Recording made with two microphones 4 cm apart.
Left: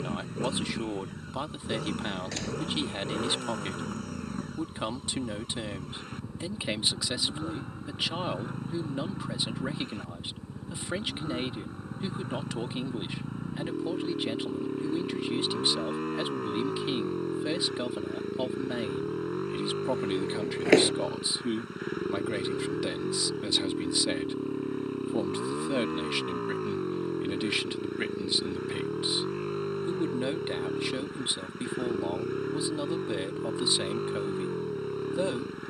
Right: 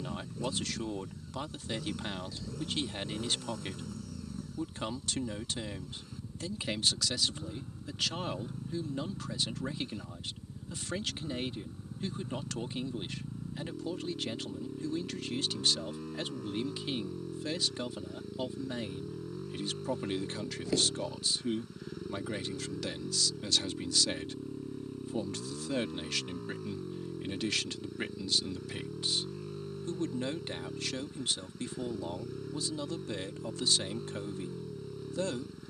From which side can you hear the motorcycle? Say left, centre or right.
left.